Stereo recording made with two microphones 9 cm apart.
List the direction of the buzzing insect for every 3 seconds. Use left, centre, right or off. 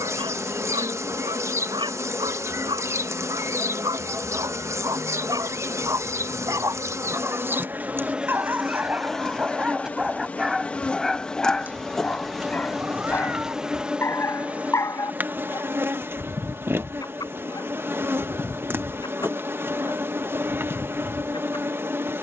right, right, right, centre, centre, right, right, right.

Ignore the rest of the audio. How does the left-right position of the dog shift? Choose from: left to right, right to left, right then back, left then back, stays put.
right to left.